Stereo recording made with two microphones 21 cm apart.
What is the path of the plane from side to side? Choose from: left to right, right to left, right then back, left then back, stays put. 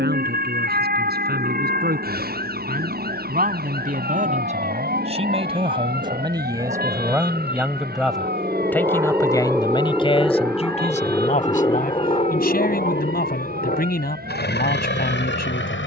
right to left.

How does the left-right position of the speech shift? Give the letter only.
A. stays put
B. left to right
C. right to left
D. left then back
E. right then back
C.